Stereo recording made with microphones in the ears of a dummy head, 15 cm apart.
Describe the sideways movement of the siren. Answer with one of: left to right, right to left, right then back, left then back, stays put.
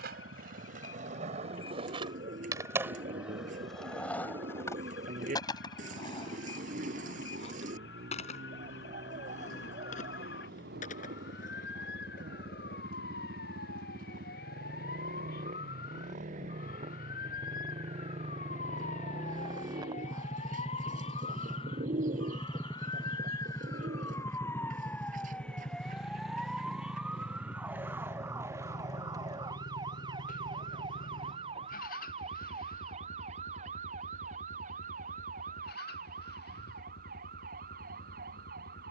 left to right.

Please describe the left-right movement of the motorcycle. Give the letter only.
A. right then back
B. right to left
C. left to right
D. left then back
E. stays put
B.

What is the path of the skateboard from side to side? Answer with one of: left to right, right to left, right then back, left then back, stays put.
right to left.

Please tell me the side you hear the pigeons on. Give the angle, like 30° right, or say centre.
50° right.